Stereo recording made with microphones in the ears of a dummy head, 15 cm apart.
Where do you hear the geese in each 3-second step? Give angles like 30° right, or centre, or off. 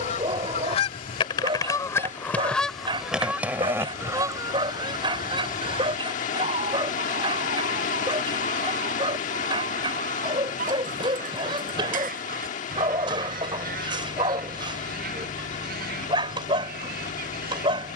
20° left, 20° right, 40° right, 50° right, 60° right, 60° right.